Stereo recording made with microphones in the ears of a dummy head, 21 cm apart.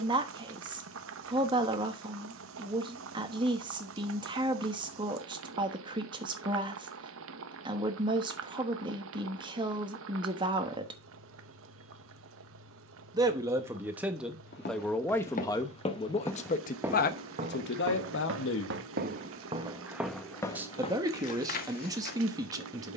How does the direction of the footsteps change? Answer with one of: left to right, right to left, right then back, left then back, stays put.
right then back.